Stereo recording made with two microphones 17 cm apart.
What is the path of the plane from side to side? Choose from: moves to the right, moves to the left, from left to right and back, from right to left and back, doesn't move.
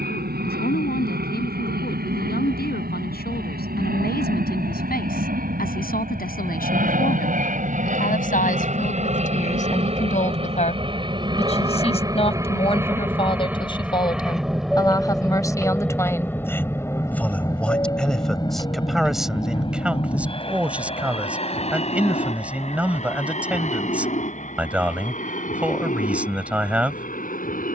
moves to the left.